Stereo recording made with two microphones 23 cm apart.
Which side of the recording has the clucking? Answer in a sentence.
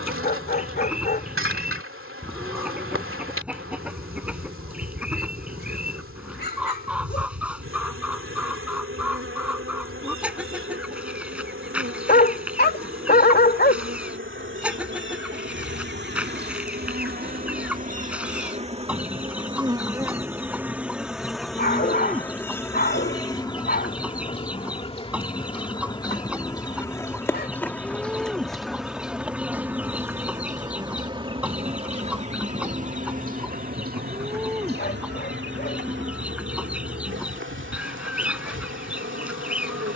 You can hear the clucking in the centre.